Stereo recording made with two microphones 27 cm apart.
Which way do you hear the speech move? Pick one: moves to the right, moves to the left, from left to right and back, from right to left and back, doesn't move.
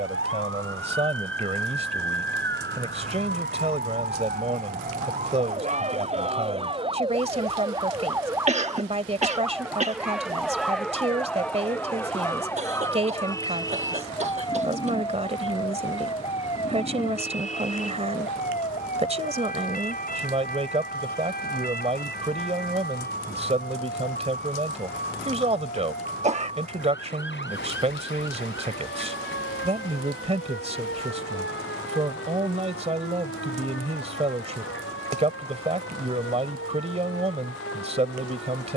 doesn't move.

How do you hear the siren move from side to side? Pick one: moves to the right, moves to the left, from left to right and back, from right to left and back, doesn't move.
moves to the left.